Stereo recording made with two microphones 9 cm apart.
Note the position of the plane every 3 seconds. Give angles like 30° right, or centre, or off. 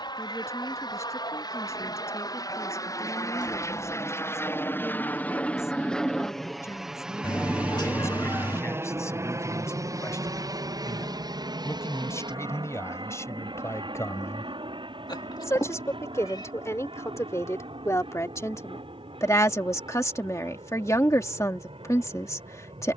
50° left, 30° left, 10° right, 40° right, 60° right, 60° right, 70° right, 70° right.